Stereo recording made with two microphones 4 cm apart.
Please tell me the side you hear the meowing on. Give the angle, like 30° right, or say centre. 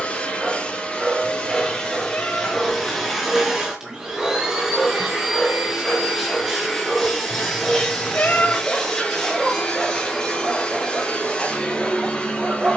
40° left.